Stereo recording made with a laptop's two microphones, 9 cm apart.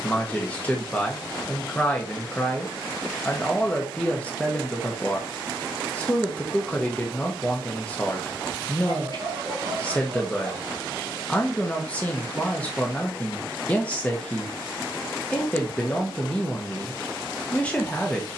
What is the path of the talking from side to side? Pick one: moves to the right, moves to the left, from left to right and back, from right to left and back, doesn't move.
doesn't move.